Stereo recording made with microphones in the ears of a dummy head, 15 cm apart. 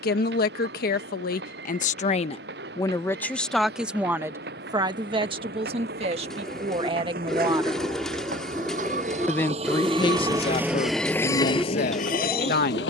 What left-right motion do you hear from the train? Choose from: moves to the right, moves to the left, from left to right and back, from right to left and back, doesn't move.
moves to the left.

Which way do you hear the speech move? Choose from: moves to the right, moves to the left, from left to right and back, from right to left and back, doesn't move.
from left to right and back.